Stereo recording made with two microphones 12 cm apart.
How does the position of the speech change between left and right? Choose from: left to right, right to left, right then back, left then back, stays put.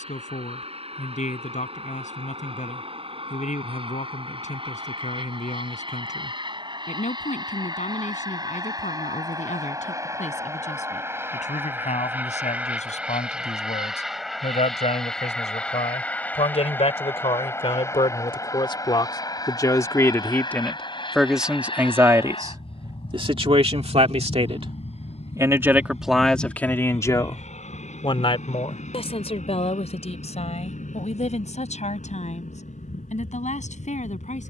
right then back.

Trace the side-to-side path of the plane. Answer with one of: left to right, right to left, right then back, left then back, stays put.
right to left.